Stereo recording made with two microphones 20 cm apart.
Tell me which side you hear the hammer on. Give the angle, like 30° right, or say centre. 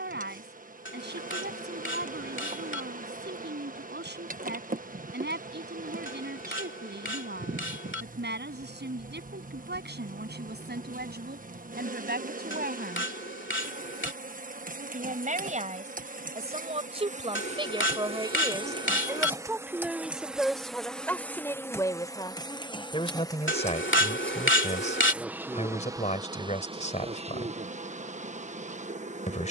70° left.